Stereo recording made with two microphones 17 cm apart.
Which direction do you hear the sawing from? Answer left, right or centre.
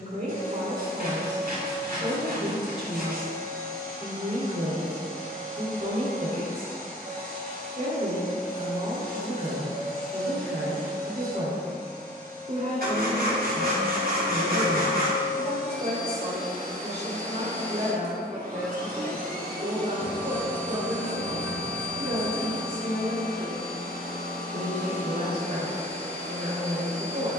right.